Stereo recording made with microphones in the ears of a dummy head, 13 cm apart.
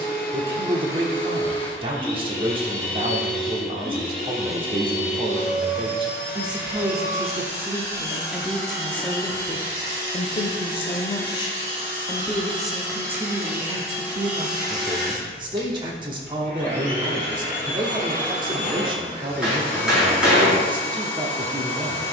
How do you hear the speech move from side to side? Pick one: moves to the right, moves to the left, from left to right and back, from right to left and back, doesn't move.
from right to left and back.